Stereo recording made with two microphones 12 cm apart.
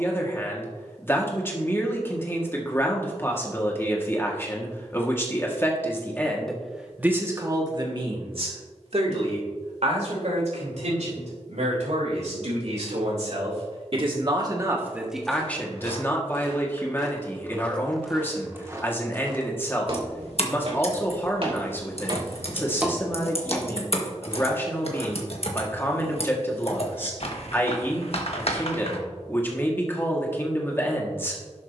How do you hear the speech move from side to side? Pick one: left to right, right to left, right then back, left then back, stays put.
right then back.